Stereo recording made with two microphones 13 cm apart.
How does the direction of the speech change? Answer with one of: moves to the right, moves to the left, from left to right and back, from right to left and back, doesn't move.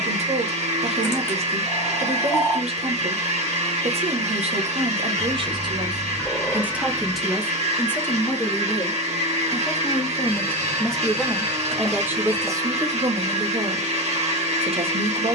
from right to left and back.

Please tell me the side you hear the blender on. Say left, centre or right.
right.